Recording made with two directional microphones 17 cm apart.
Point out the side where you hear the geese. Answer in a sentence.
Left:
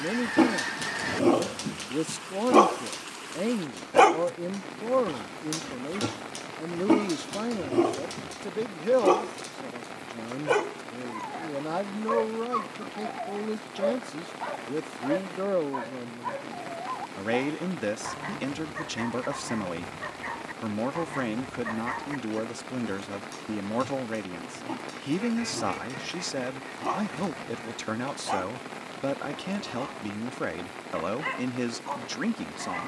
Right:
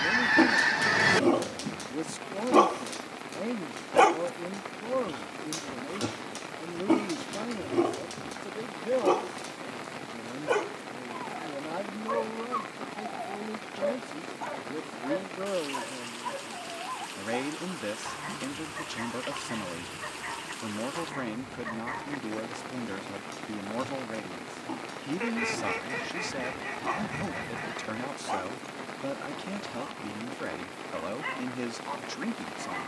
You can hear the geese on the right.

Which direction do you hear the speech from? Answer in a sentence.
You can hear the speech on the left.